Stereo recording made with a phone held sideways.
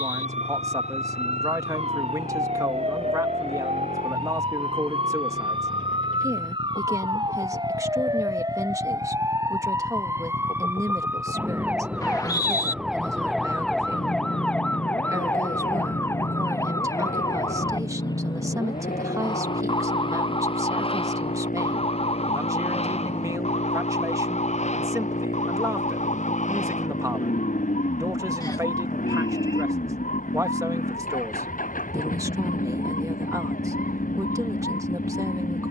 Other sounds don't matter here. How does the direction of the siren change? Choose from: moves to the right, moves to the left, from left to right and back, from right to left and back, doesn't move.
moves to the left.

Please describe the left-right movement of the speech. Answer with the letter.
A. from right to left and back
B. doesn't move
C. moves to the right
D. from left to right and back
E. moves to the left
B.